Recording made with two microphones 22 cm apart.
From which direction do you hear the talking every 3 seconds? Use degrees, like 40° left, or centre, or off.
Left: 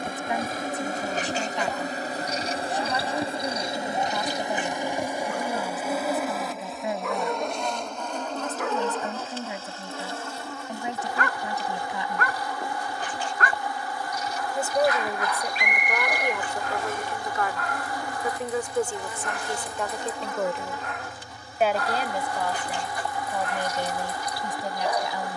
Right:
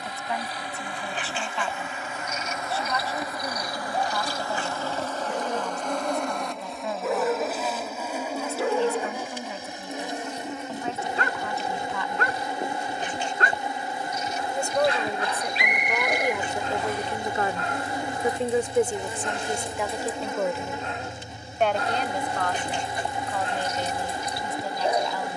20° left, 20° left, 20° left, 20° left, 10° left, 10° right, 10° right, 10° left, 20° left.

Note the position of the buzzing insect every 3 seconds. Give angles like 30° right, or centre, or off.
40° left, 20° left, centre, 20° right, 20° right, 20° right, 20° right, 20° right, 20° right.